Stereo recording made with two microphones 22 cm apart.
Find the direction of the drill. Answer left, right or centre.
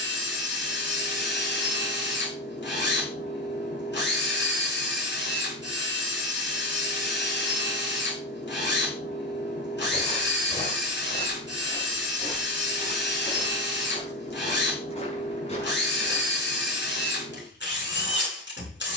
left.